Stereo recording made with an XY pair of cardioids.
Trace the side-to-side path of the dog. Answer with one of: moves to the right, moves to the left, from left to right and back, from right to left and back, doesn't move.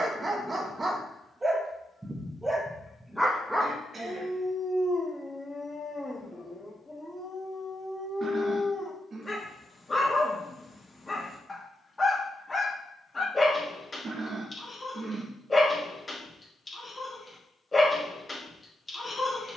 moves to the left.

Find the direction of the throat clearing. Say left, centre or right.
right.